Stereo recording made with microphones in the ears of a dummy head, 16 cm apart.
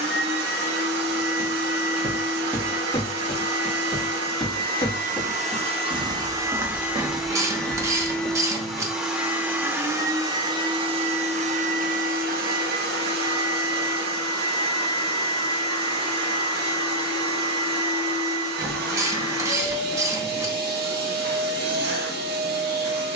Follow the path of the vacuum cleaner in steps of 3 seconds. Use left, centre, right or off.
right, right, centre, right, right, right, right, right.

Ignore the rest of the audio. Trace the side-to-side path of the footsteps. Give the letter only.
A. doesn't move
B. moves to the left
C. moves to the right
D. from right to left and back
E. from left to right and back
D.